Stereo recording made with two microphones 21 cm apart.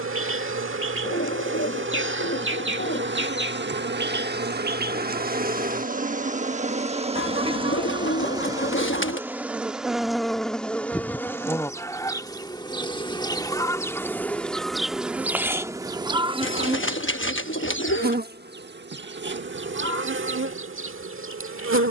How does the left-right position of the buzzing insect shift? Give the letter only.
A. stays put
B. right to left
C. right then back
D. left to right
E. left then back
E.